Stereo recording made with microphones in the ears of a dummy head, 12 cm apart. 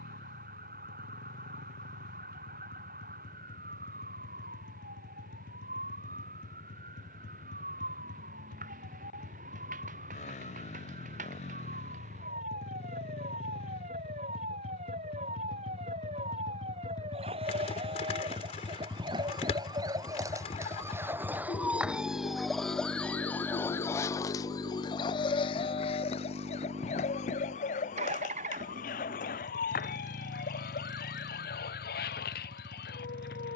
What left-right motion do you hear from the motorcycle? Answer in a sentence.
You can hear the motorcycle travel towards the right.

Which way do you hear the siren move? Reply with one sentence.
You can hear the siren move from right to left.